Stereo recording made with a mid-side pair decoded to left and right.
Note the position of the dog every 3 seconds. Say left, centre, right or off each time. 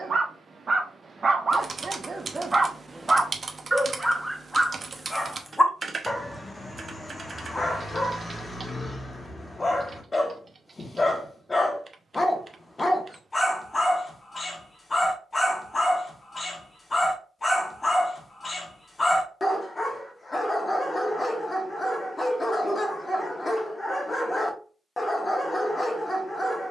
right, centre, left, left, left, left, left, left, left.